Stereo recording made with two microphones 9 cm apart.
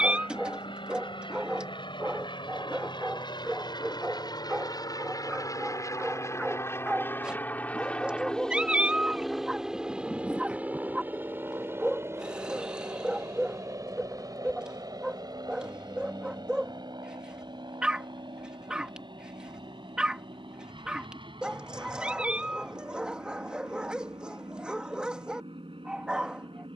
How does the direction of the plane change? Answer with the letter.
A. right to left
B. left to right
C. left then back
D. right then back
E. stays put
B.